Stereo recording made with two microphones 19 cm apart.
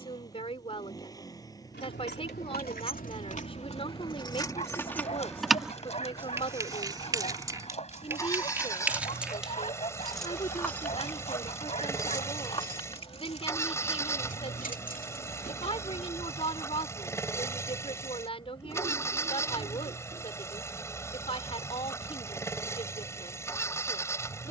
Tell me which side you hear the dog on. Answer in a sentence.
In this clip you hear the dog on the left.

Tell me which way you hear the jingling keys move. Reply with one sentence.
In this clip you hear the jingling keys go right and come back.